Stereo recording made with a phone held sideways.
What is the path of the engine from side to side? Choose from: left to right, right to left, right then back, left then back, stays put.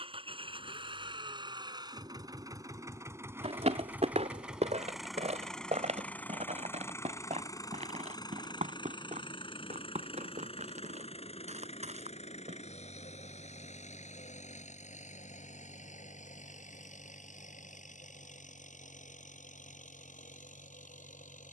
right to left.